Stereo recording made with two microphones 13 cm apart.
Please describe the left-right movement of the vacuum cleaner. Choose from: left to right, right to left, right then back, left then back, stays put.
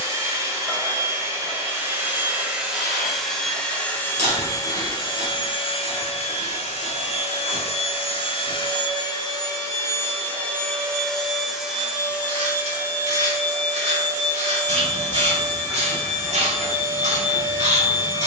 left then back.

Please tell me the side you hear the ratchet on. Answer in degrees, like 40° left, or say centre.
60° right.